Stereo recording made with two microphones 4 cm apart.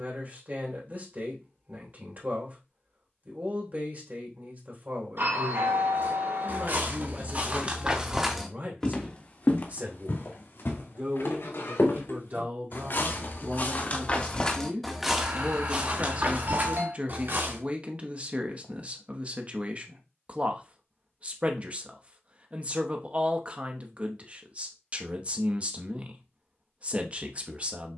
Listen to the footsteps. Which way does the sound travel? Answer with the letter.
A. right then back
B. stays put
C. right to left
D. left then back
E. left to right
D.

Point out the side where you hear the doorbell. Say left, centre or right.
right.